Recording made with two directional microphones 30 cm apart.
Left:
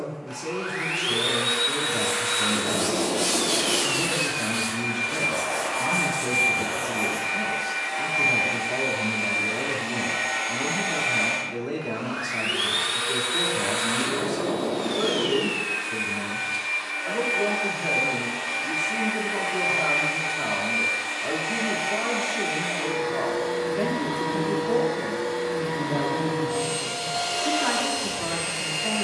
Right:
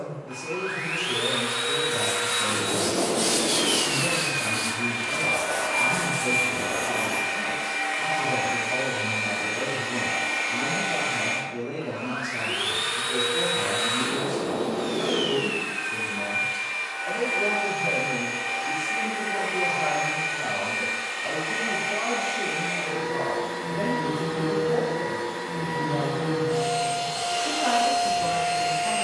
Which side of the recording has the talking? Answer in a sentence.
You can hear the talking on the left.